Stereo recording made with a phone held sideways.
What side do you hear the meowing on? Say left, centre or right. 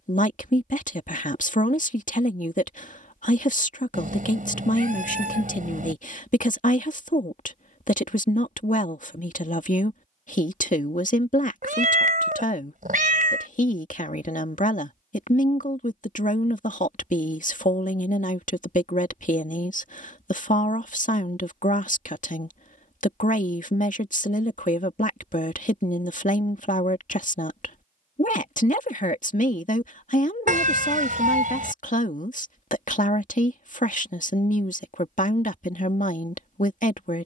right.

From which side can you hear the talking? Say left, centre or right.
left.